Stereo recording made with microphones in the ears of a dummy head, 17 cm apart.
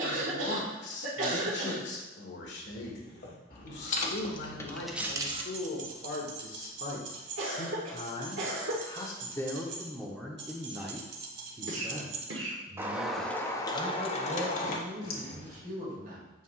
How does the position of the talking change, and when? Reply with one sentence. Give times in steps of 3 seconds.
You can hear the talking on the left from 0 s, in the centre from 9 s and on the right from 12 s.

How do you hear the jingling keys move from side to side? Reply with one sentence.
In this clip you hear the jingling keys move from left to right and back again.